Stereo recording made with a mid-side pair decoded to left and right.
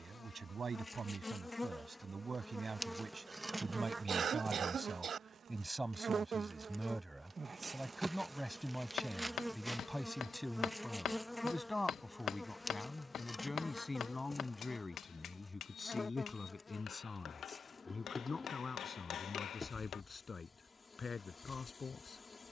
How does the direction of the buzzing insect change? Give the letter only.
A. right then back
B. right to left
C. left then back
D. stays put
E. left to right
A.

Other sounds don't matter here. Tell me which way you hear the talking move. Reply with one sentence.
In this clip you hear the talking go from the right side to the left.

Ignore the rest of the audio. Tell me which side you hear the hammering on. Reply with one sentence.
In this clip you hear the hammering on the left.